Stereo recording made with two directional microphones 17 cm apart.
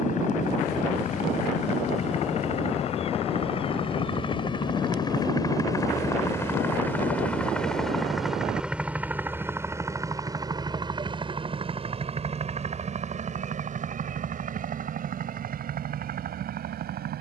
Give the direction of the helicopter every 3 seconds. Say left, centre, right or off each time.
left, left, centre, right, right, right.